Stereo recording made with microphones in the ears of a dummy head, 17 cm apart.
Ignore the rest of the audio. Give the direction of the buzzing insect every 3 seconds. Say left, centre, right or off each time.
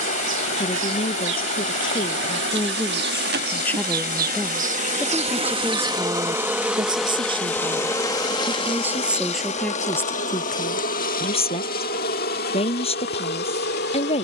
right, right, centre, left, left.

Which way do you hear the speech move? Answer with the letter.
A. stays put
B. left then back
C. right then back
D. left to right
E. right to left
C.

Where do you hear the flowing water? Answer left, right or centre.
left.